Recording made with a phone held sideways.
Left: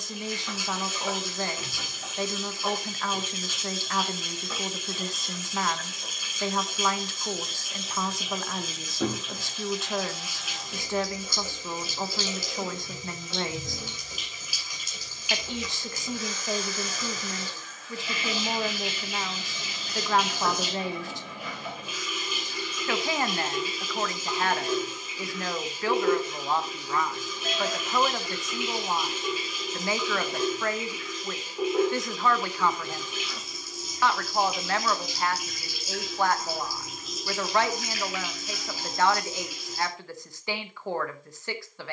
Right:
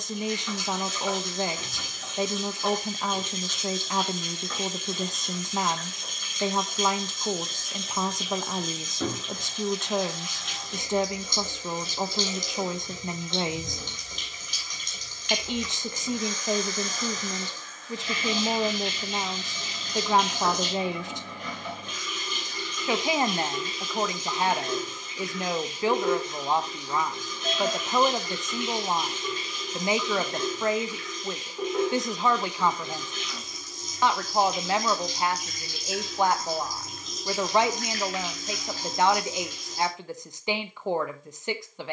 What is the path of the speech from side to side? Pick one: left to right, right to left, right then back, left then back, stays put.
stays put.